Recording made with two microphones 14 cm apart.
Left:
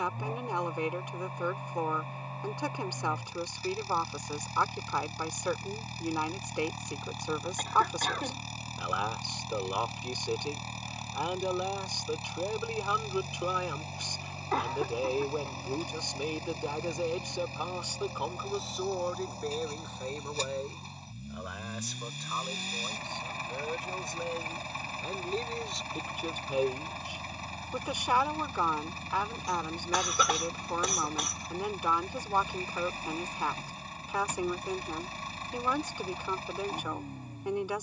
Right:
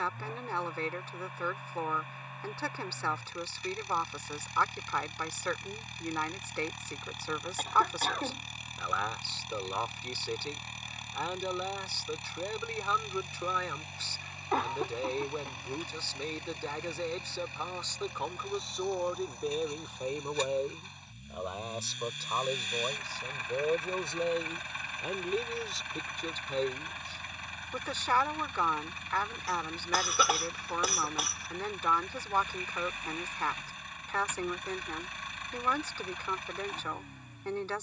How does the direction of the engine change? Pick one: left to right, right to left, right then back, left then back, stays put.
stays put.